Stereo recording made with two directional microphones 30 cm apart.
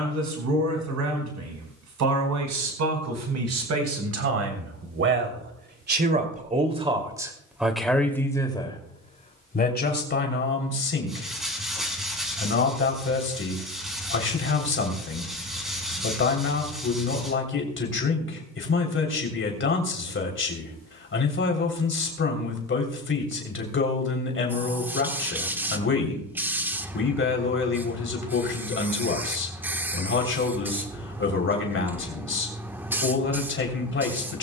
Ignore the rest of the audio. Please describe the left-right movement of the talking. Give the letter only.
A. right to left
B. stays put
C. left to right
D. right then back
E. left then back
A.